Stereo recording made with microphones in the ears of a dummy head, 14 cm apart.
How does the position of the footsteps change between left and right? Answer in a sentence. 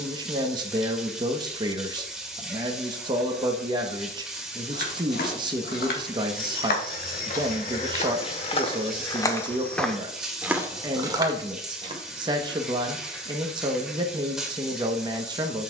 You can hear the footsteps go from the left side to the right.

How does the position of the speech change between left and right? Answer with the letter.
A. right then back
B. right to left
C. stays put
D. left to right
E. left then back
C.